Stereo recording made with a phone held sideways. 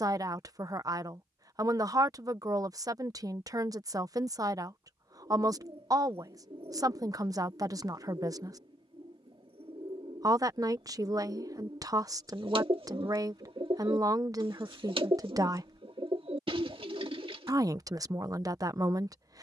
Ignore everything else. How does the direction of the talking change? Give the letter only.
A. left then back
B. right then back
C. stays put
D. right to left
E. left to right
C.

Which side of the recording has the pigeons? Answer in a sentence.
You can hear the pigeons on the right.